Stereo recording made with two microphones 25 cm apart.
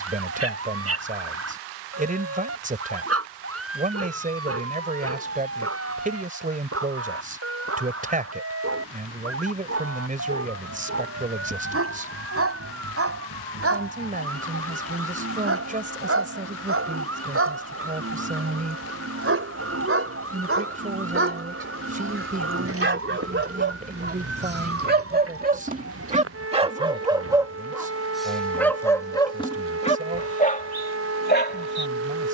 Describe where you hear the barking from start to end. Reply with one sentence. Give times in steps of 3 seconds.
In this clip you hear the barking on the right from 0 s, in the centre from 27 s and on the left from 30 s.